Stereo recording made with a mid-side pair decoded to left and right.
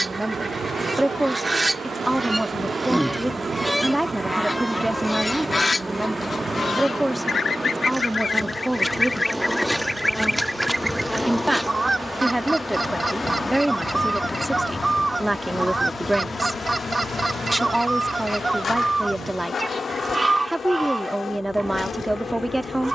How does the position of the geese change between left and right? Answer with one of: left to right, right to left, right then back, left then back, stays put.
left then back.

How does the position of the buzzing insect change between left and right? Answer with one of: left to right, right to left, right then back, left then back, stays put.
right to left.